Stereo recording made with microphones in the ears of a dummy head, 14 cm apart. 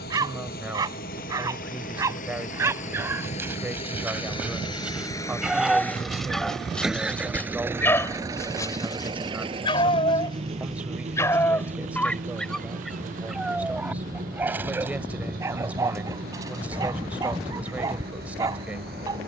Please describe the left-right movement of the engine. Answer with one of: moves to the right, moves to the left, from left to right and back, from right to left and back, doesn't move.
moves to the right.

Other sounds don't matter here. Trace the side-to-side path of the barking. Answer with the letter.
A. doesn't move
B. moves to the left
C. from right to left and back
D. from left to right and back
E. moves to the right
C.